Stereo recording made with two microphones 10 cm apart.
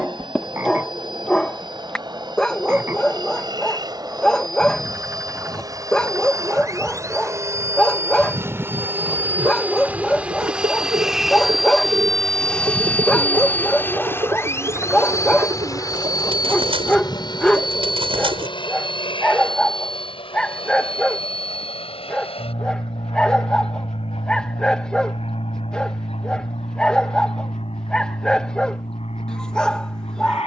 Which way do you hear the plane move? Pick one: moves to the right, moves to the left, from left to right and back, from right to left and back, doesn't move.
moves to the left.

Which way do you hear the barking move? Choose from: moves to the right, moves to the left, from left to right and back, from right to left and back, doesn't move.
doesn't move.